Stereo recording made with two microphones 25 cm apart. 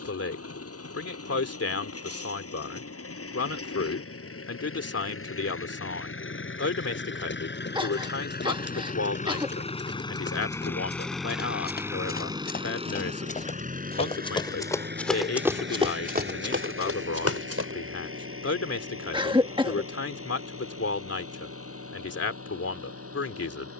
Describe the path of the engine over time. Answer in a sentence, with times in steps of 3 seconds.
In this clip you hear the engine on the left from 0 s, in the centre from 9 s and on the right from 12 s.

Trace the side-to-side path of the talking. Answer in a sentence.
You can hear the talking stay in one place.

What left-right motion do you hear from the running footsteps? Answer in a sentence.
You can hear the running footsteps travel towards the right.